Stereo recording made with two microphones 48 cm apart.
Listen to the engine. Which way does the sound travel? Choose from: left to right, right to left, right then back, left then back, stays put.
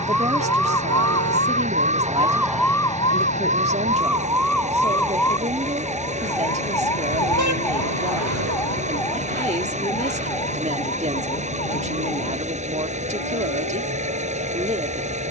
stays put.